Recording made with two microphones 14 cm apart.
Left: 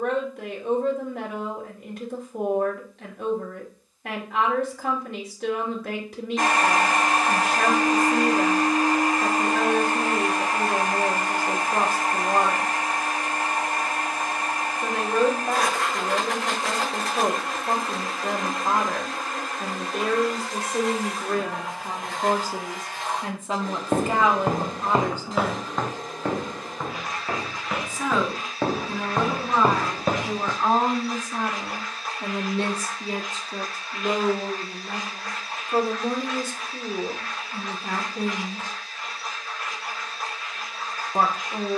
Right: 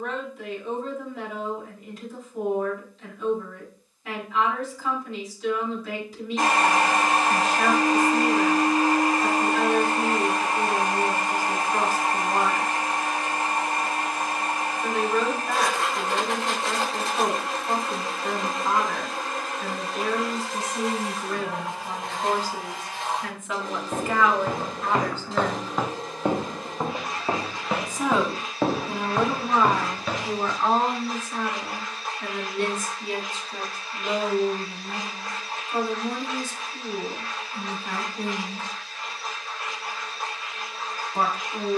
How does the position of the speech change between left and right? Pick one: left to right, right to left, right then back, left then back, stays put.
right then back.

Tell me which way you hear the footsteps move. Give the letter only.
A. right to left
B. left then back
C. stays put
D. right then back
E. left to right
D.